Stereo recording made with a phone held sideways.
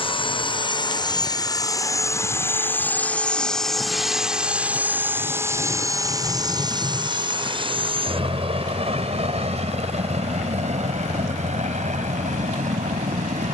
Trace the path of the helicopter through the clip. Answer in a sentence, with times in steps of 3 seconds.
In this clip you hear the helicopter on the left from 0 s, in the centre from 3 s and on the right from 6 s.